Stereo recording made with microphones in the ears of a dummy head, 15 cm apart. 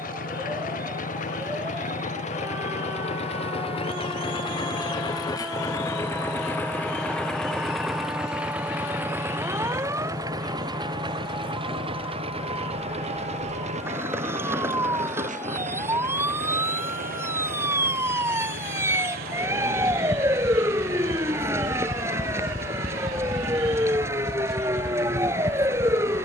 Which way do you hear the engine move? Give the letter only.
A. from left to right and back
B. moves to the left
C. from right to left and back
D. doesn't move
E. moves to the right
E.